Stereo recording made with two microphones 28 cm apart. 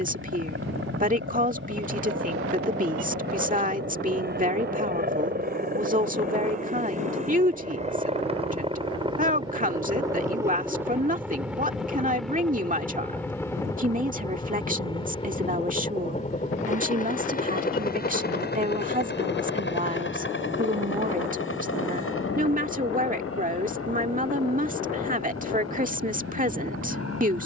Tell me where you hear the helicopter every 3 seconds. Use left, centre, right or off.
right, right, right, centre, centre, left, left, left, left.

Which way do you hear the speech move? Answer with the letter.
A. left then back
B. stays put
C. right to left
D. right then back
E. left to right
B.